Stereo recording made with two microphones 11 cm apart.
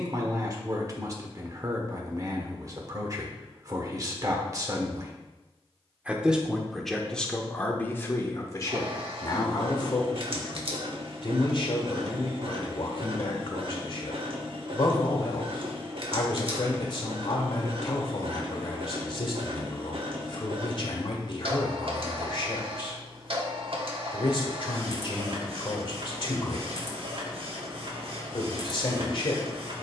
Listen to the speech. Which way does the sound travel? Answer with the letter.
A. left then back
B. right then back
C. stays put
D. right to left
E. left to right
D.